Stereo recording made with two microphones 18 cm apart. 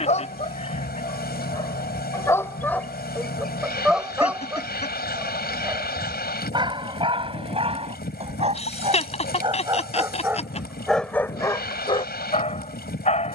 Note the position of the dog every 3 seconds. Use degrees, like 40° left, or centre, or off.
20° left, 10° right, 30° right, centre, 40° left.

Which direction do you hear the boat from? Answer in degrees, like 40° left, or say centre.
60° left.